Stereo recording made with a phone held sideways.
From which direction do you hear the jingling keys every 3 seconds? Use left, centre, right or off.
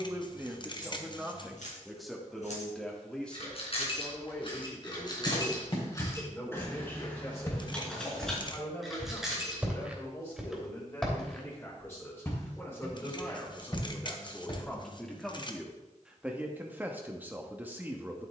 left, left, centre, centre, off, off.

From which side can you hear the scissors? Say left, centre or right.
left.